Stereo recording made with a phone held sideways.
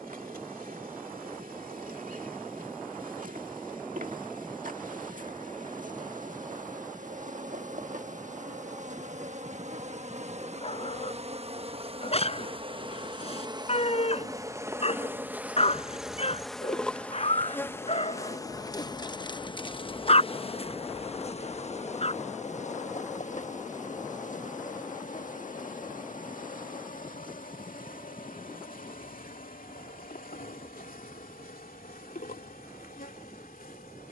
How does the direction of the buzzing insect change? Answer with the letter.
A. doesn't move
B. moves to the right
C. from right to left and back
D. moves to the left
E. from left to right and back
D.